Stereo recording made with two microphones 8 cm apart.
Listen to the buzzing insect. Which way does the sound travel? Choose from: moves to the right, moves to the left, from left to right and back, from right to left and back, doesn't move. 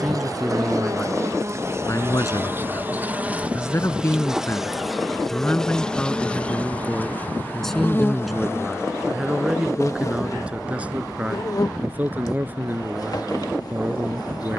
moves to the left.